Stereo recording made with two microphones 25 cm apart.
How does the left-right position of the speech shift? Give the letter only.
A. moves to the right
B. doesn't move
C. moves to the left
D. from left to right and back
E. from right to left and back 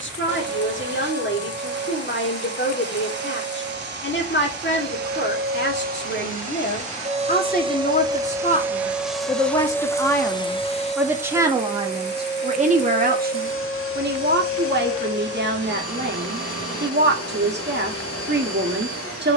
A.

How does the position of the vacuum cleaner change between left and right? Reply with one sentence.
You can hear the vacuum cleaner travel towards the left.